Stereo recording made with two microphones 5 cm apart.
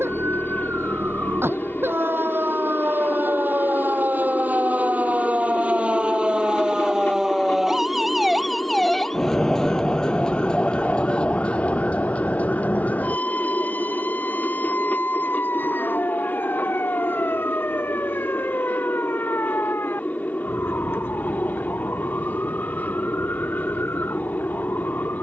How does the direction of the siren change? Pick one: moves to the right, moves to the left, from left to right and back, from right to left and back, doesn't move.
moves to the left.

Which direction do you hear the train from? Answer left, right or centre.
left.